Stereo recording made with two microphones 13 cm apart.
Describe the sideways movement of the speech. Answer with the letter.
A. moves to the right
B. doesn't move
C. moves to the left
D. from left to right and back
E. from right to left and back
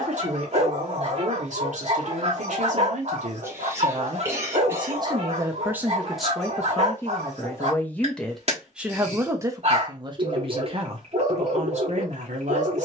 E.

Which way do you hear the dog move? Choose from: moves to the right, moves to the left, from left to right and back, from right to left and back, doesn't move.
doesn't move.